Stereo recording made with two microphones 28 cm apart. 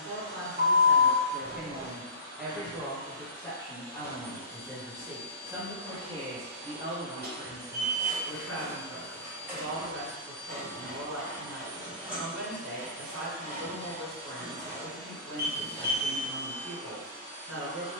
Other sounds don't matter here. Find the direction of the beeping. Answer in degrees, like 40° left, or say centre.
40° right.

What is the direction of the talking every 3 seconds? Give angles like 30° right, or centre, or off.
30° right, centre, 40° right, 50° right, 50° right, 50° right.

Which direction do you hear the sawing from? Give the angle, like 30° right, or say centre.
10° right.